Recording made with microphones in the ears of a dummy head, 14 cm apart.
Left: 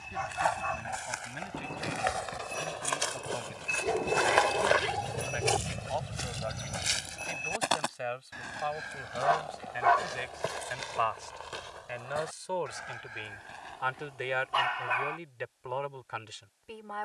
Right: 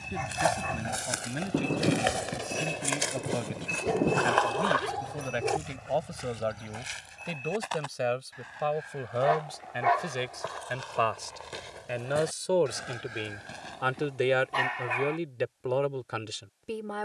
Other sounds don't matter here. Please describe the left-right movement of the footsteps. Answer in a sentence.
In this clip you hear the footsteps go left and come back.